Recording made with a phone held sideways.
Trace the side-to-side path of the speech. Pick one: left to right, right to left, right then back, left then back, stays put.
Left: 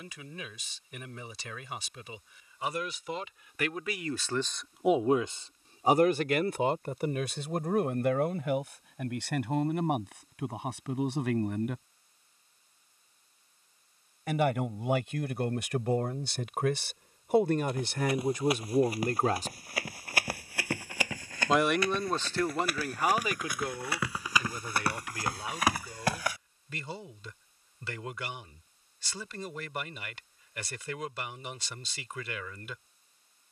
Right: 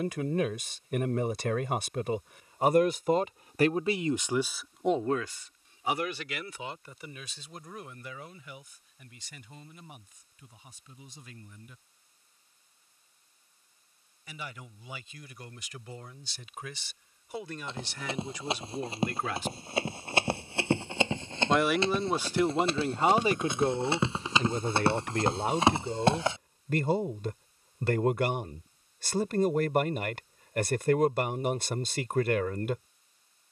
left then back.